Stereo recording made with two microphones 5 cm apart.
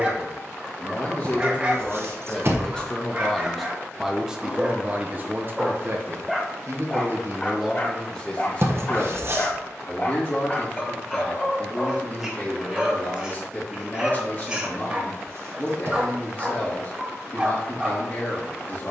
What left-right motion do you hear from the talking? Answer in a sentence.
In this clip you hear the talking move from left to right and back again.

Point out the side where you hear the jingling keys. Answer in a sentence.
You can hear the jingling keys on the right.